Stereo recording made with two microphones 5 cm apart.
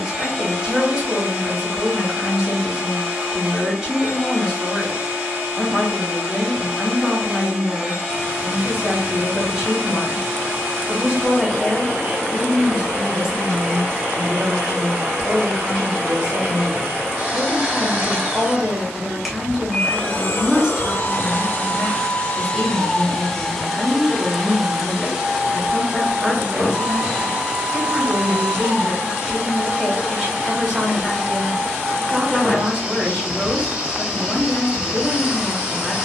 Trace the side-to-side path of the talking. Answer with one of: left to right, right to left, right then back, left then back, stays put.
stays put.